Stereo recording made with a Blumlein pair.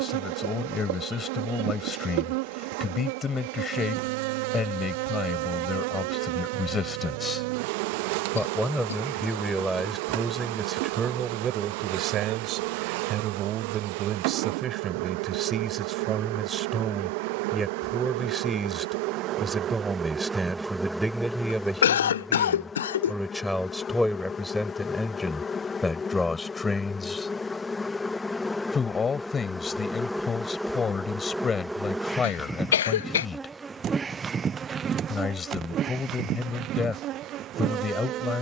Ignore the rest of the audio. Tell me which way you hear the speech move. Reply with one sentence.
You can hear the speech move from left to right and back again.